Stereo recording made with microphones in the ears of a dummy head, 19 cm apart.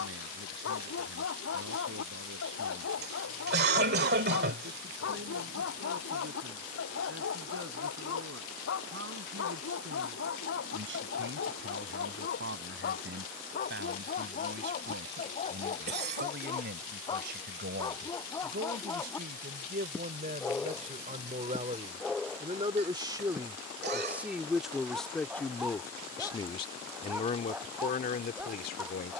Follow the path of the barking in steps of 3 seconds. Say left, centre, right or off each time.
left, left, left, left, left, left, centre, centre, centre, centre.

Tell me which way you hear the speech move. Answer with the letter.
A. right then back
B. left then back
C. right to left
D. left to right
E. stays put
C.